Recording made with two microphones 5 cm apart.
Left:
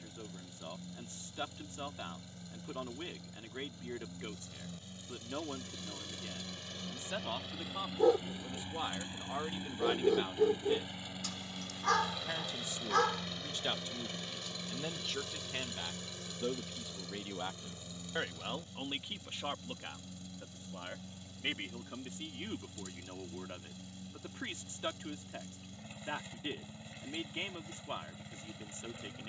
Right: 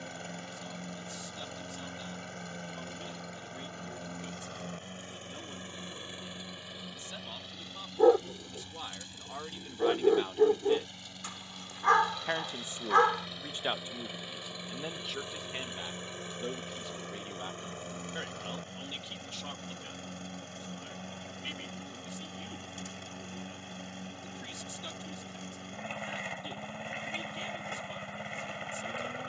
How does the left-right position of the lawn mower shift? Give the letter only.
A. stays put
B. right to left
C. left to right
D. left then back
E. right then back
D.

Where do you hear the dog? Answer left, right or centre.
right.